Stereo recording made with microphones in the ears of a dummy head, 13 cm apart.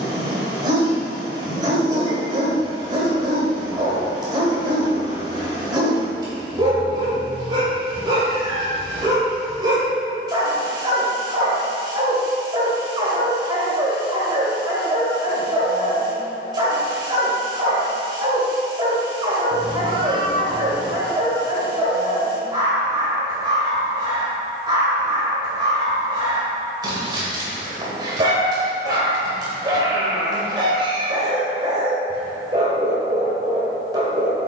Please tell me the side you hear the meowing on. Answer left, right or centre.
right.